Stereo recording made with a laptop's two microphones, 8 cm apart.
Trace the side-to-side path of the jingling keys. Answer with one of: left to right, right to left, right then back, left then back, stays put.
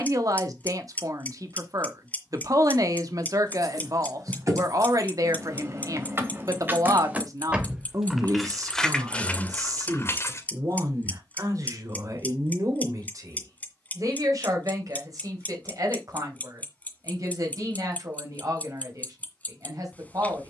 right to left.